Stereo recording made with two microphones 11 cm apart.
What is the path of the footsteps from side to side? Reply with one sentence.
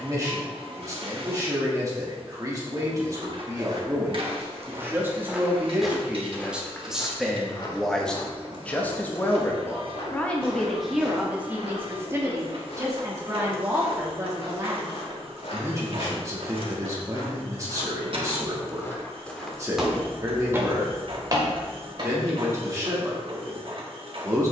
In this clip you hear the footsteps move from right to left and back again.